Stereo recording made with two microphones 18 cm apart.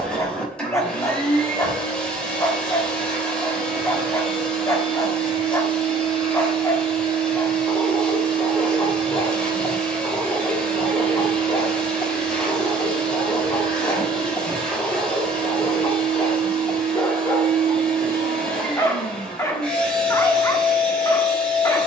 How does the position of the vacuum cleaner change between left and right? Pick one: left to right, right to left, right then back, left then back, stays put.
stays put.